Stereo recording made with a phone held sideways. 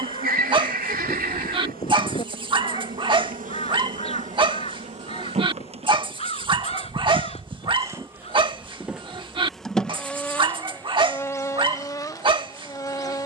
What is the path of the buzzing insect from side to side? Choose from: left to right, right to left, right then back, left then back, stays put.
right to left.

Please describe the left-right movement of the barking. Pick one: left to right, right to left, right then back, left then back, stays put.
stays put.